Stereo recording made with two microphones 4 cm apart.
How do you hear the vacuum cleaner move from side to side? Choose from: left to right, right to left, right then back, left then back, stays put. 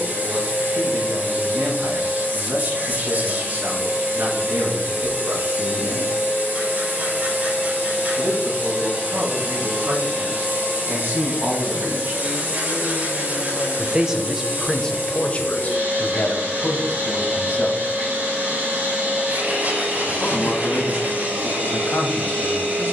stays put.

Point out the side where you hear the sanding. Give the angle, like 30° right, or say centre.
40° right.